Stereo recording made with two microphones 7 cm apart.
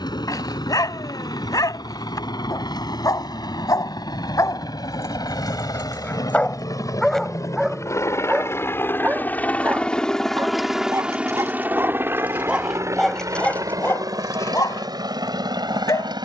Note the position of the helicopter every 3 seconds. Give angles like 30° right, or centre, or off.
70° left, 60° left, 50° left, centre, 50° right, 60° right.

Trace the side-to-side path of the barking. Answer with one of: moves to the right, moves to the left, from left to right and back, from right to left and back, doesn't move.
from left to right and back.